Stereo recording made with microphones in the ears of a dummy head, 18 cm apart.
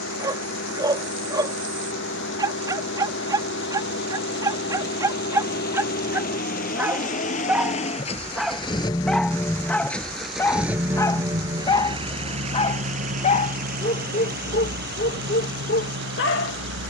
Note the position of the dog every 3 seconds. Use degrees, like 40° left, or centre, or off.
20° right, 20° right, 10° right, 10° left, 40° left, 50° left.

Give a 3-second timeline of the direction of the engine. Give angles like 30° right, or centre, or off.
70° left, 60° left, 40° left, centre, 40° right, 60° right.